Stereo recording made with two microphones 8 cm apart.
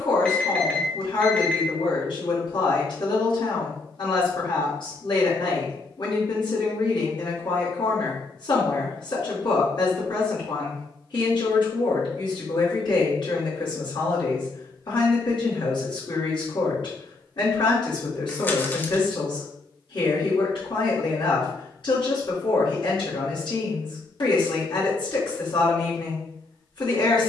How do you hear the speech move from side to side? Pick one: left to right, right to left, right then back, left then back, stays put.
stays put.